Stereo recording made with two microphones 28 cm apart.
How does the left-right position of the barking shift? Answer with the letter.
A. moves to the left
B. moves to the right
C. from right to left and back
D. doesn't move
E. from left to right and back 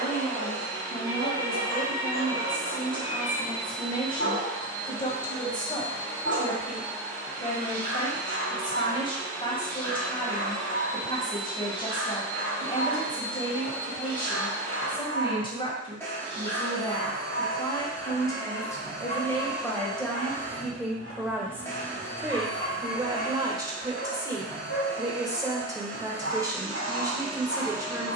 D.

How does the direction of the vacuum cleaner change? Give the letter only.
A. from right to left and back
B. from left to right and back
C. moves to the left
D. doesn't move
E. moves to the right
D.